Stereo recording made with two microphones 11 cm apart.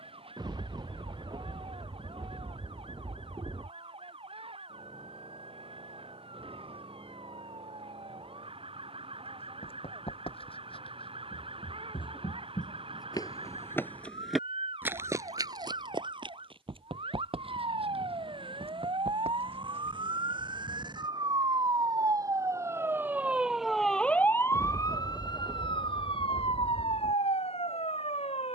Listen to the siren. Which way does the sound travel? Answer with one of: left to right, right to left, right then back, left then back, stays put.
right to left.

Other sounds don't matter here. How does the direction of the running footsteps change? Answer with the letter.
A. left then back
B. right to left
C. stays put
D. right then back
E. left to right
E.